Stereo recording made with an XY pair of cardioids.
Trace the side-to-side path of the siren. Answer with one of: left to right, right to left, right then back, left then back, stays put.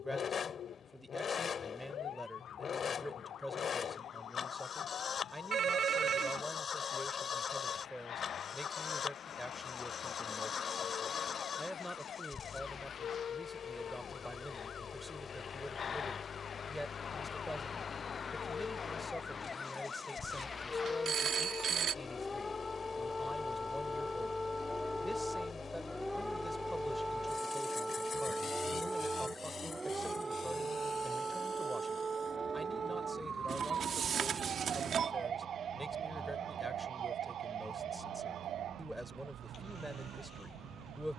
left to right.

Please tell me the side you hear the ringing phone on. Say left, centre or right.
right.